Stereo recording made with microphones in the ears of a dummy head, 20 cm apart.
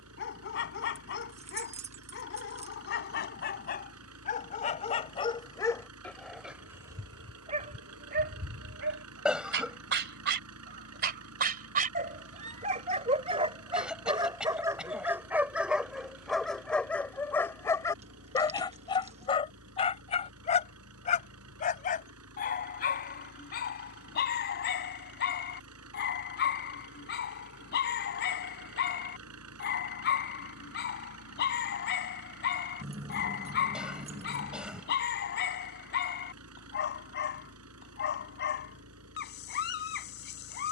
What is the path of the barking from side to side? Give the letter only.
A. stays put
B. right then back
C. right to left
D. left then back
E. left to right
B.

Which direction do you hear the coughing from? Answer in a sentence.
In this clip you hear the coughing in the centre.